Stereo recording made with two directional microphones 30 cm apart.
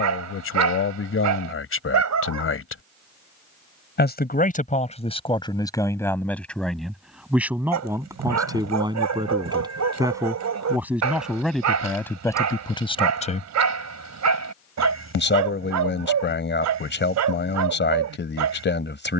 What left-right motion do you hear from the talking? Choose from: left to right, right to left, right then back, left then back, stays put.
right then back.